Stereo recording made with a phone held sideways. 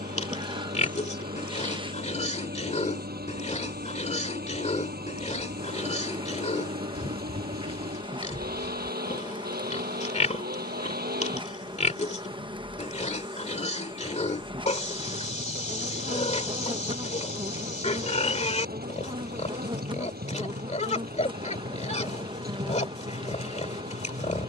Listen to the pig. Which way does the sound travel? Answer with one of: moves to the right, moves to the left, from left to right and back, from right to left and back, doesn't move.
doesn't move.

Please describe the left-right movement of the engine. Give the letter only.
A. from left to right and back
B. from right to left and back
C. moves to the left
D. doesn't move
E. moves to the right
D.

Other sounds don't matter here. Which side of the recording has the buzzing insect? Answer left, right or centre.
right.